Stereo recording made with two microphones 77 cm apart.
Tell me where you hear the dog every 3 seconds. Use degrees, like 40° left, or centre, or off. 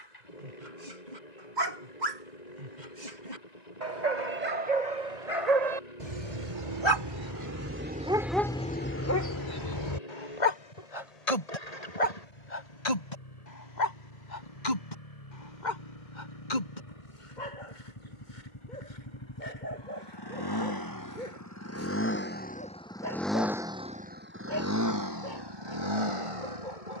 70° right, 60° right, 20° right, 40° left, 70° left, 70° left, 80° left, 80° left, 80° left.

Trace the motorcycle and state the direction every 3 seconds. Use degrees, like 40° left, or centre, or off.
60° left, 60° left, 60° left, 60° left, 50° left, 50° left, 30° left, 10° left, 30° right.